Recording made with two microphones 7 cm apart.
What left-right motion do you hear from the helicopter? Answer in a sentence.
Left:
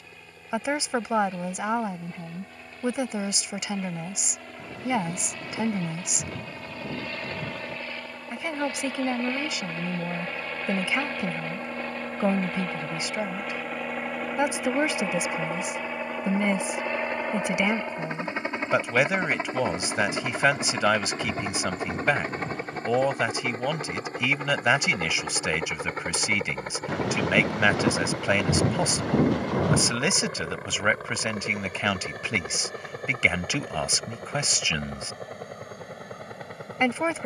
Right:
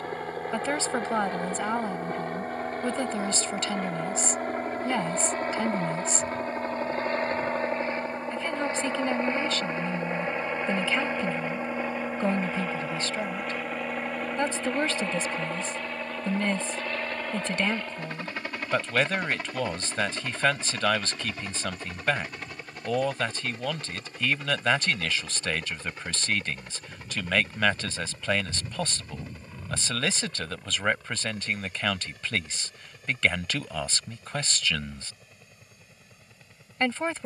In this clip you hear the helicopter go from the right side to the left.